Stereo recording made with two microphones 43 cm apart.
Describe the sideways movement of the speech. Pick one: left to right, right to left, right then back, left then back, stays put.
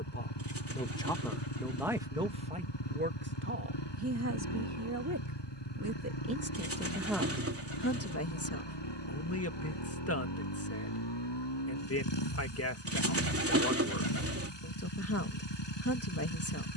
right then back.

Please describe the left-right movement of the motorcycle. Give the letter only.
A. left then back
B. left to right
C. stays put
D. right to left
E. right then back
C.